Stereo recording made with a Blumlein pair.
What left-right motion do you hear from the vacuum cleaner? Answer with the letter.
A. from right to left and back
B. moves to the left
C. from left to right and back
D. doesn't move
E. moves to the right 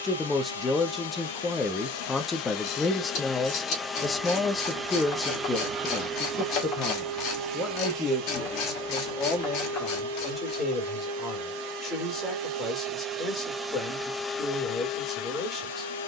C.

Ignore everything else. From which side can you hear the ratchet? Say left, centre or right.
left.